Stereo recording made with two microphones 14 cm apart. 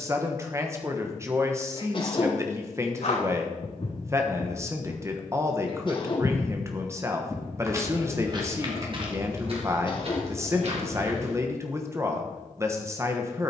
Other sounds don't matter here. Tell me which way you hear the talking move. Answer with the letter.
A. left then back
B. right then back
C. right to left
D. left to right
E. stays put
E.